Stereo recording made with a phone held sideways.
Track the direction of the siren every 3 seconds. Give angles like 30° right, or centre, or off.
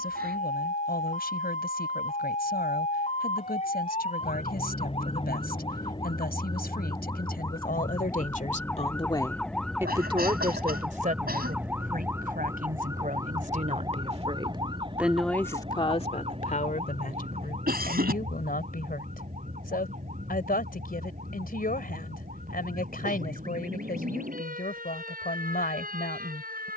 50° left, 40° left, 20° left, centre, 20° right, 40° right, 50° right, 50° right, 60° right.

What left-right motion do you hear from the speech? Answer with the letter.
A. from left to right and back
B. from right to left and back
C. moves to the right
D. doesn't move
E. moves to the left
A.